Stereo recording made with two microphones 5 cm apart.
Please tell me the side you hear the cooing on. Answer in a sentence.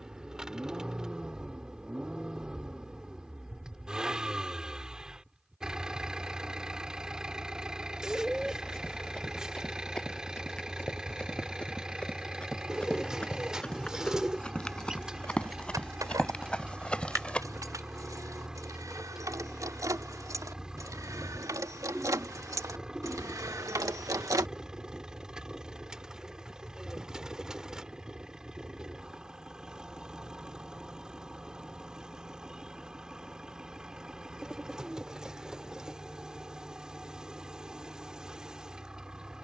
In this clip you hear the cooing in the centre.